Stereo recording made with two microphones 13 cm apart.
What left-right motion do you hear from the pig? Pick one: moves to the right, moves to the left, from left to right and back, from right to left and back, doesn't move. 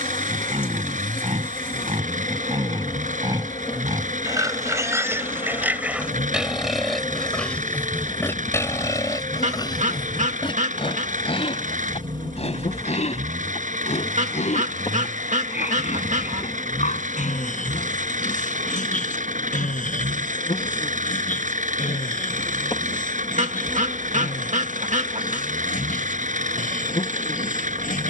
moves to the left.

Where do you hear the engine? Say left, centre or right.
right.